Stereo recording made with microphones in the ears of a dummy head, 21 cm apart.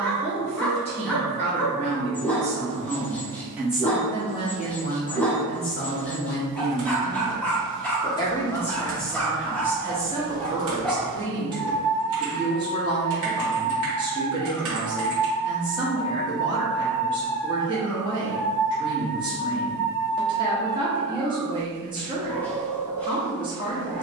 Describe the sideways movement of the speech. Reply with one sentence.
You can hear the speech move from right to left and back again.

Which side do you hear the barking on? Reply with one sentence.
In this clip you hear the barking in the centre.